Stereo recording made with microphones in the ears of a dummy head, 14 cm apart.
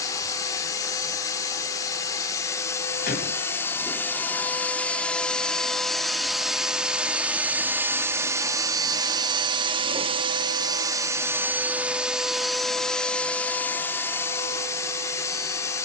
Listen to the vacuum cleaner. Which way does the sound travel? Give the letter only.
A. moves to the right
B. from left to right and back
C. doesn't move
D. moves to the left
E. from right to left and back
B.